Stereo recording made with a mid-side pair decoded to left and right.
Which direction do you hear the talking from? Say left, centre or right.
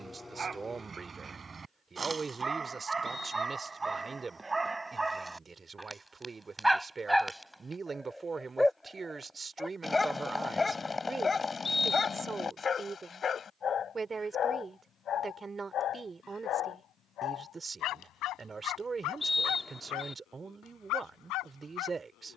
right.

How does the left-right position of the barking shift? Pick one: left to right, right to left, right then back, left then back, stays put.
right to left.